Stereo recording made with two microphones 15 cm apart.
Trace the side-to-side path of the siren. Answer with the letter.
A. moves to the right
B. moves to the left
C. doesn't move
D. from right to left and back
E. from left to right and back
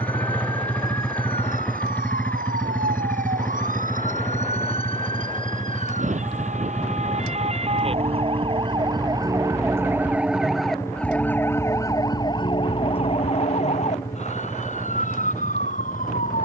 B.